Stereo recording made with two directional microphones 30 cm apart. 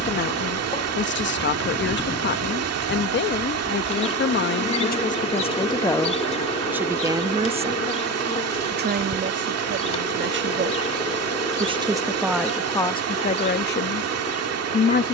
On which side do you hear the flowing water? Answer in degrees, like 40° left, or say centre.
50° right.